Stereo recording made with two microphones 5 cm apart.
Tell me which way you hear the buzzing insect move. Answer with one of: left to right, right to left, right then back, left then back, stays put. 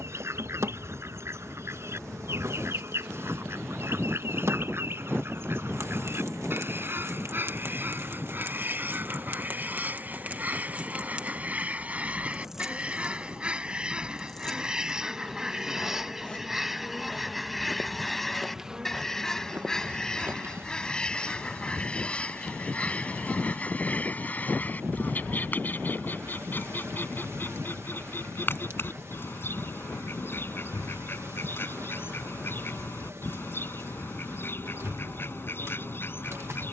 left then back.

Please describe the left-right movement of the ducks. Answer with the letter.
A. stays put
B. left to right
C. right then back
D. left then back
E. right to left
E.